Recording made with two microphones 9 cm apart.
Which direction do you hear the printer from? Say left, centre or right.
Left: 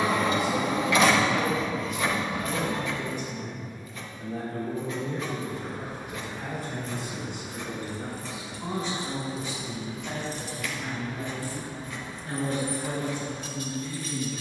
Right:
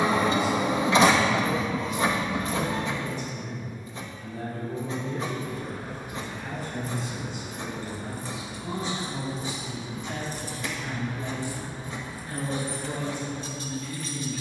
right.